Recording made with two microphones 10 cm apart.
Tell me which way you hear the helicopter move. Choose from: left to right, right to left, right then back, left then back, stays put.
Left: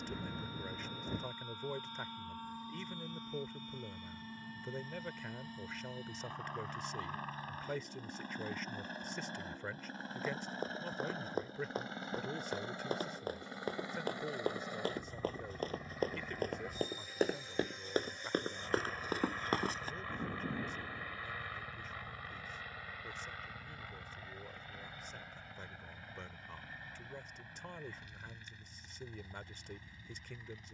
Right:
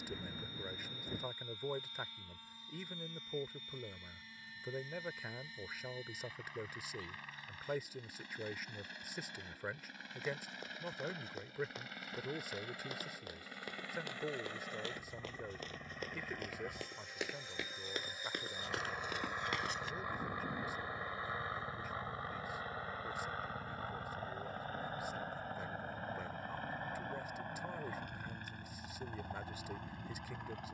left to right.